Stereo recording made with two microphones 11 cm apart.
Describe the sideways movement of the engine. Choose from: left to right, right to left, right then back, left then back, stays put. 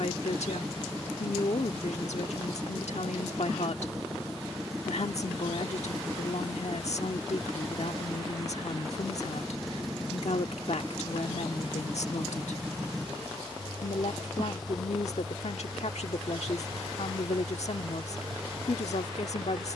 stays put.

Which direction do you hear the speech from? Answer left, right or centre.
left.